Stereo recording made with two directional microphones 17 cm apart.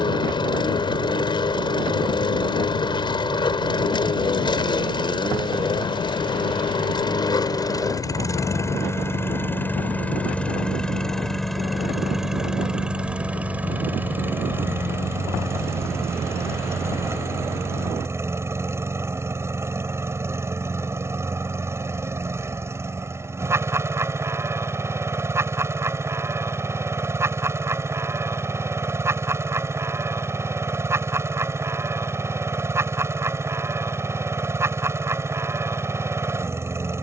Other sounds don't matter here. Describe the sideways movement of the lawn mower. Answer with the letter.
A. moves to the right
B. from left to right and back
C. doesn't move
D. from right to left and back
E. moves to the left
A.